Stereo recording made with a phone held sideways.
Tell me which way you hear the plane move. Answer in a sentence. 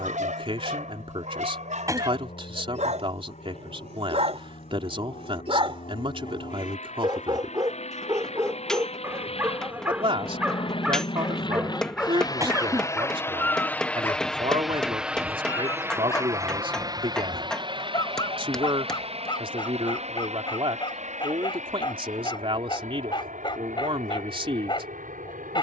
In this clip you hear the plane move from left to right.